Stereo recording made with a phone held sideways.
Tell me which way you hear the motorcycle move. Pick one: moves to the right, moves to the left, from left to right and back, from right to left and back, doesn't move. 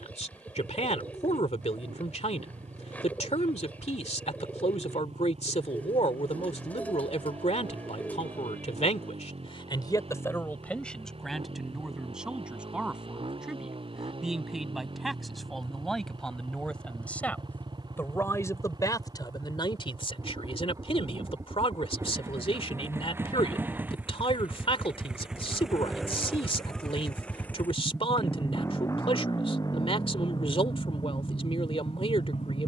moves to the left.